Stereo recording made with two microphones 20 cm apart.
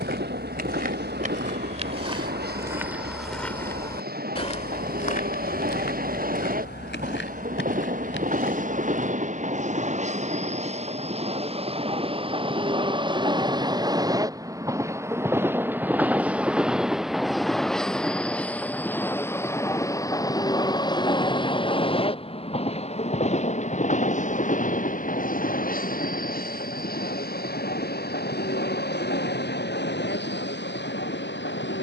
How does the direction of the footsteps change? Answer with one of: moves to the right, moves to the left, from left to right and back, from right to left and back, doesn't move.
moves to the left.